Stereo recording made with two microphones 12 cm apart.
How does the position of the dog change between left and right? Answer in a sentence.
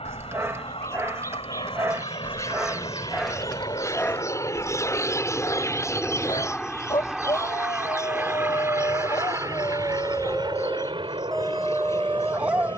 You can hear the dog move from right to left and back again.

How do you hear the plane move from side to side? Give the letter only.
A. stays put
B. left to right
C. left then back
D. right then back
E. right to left
B.